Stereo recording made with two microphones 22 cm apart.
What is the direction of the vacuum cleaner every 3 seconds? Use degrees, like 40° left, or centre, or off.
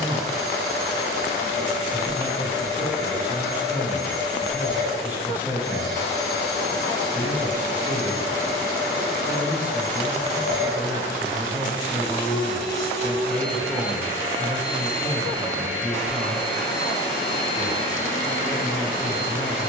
50° left, 50° left, 50° left, 50° left, centre, 10° left, 40° left.